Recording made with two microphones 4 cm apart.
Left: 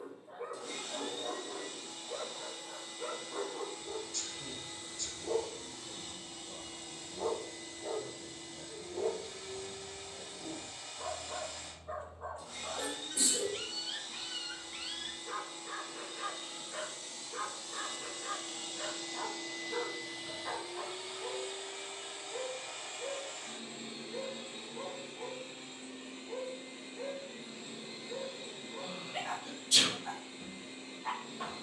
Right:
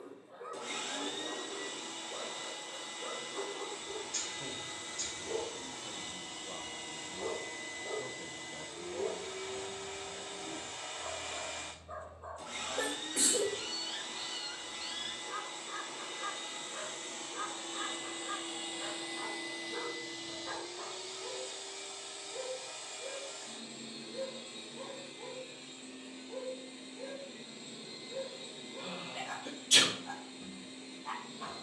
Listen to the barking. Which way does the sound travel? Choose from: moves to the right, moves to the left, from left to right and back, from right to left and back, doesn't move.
doesn't move.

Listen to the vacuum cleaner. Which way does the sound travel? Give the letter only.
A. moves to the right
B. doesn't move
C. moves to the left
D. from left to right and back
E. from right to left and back
C.